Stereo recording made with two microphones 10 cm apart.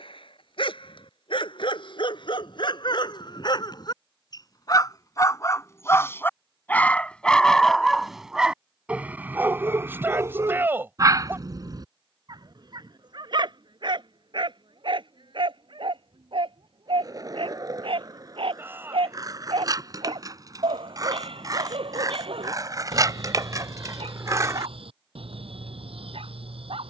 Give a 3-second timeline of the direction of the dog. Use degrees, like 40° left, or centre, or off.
60° left, 40° left, 10° left, 30° right, 50° right, 60° right, 70° right, 70° right, 70° right.